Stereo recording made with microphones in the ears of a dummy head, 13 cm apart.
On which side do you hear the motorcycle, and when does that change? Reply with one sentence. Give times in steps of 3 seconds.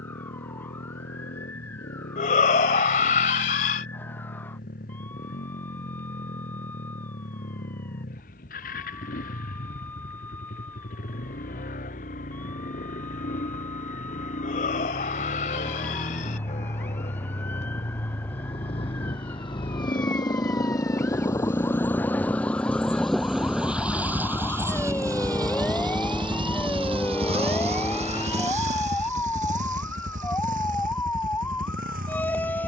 You can hear the motorcycle on the left from 0 s, in the centre from 21 s and on the right from 24 s.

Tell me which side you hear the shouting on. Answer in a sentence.
You can hear the shouting on the left.